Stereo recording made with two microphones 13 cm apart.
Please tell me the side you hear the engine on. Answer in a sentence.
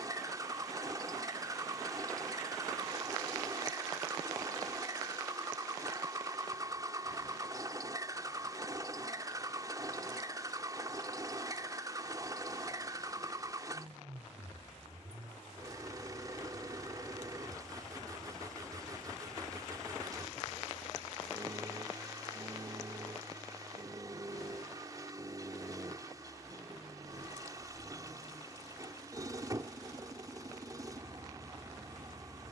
You can hear the engine on the right.